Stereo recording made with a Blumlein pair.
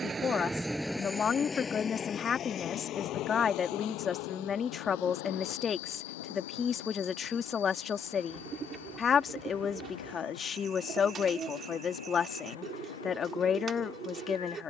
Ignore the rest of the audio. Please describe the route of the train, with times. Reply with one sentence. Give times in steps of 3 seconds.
You can hear the train in the centre from 0 s and on the left from 3 s.